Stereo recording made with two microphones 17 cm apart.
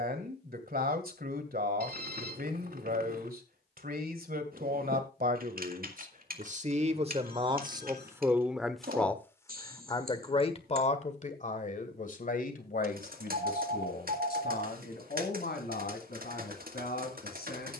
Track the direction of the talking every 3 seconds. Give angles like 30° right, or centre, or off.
60° right, 60° right, 30° right, 40° left, 60° left, 70° left.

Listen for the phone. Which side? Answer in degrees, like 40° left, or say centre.
70° right.